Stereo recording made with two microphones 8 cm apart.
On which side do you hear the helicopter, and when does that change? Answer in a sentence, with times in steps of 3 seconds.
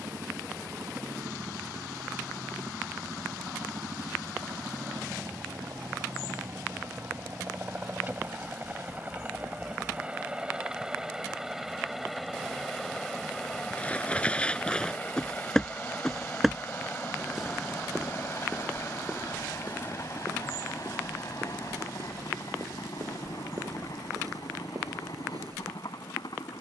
In this clip you hear the helicopter on the right from 0 s, in the centre from 9 s and on the left from 15 s.